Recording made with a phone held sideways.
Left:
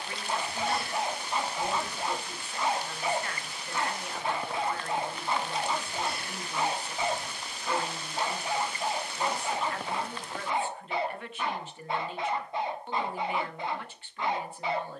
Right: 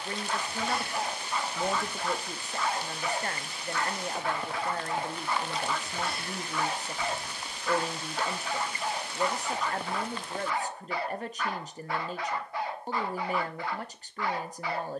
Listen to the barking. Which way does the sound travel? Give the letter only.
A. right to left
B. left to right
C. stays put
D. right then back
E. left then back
C.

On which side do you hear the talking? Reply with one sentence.
In this clip you hear the talking on the right.